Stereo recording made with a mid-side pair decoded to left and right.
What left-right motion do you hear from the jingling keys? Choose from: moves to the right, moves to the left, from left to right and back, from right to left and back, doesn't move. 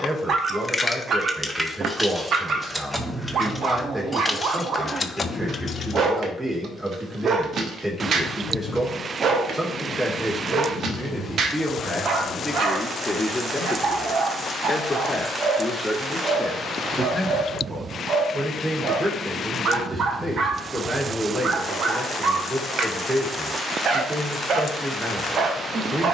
from left to right and back.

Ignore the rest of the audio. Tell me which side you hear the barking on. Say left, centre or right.
right.